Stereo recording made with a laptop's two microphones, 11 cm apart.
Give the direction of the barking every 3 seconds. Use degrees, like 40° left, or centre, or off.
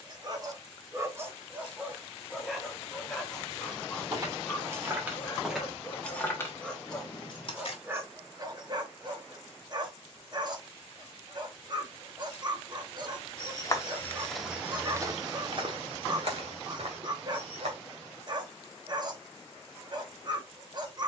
20° right, 10° left, 10° right, 40° right, 40° right, 40° right, 40° right.